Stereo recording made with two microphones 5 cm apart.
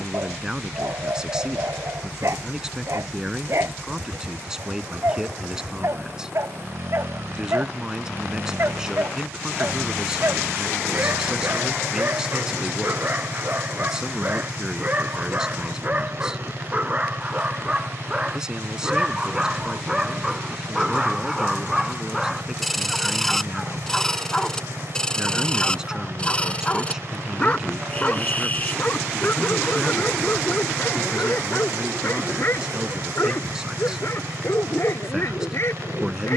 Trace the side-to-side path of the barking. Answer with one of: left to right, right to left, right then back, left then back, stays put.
right to left.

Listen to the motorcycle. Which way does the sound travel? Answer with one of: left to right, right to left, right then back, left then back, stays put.
stays put.